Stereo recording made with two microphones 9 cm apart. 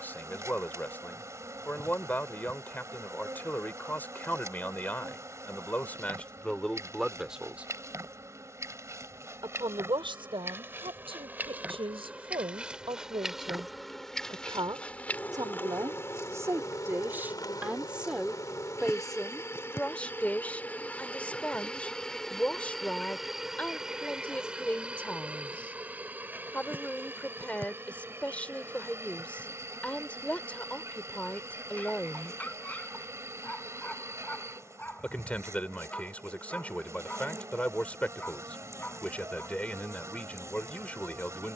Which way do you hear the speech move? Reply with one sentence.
You can hear the speech go right and come back.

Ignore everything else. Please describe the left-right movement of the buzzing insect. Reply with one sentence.
You can hear the buzzing insect move from right to left and back again.